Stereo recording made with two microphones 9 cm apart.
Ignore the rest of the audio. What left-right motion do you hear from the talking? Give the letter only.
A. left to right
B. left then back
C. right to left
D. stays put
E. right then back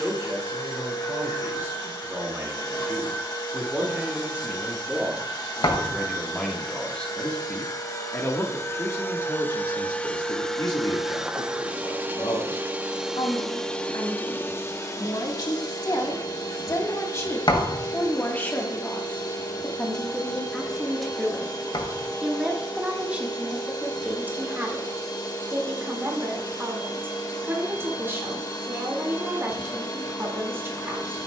B.